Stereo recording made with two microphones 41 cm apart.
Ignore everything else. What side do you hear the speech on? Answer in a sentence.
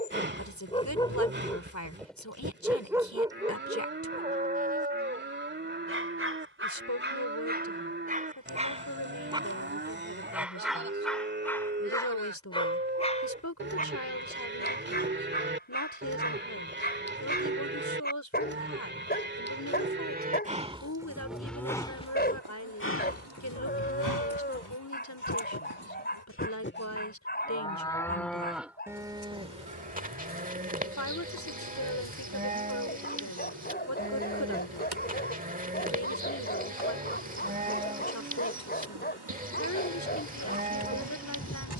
In this clip you hear the speech on the left.